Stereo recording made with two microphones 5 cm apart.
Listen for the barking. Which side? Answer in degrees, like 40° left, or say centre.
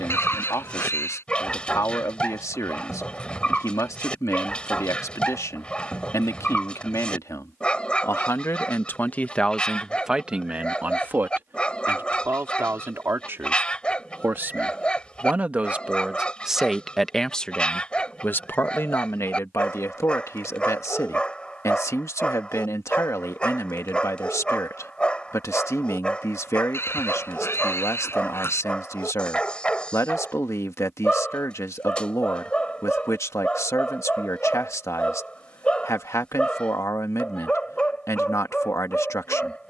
20° left.